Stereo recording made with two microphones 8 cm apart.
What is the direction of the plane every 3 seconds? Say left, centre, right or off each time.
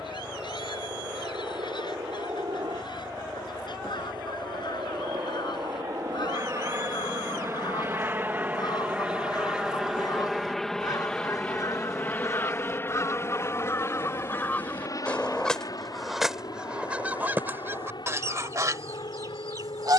right, right, right, centre, left, left, left.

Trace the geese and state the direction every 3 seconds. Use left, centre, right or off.
left, left, left, left, left, centre, right.